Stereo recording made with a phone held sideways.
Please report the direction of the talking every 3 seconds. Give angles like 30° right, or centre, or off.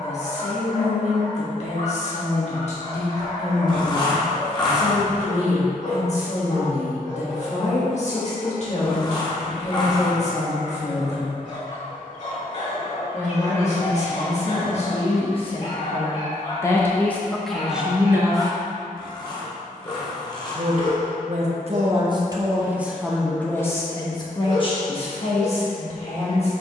50° left, 50° left, 50° left, 50° left, 50° left, 20° left, 40° right, 10° right, 40° left.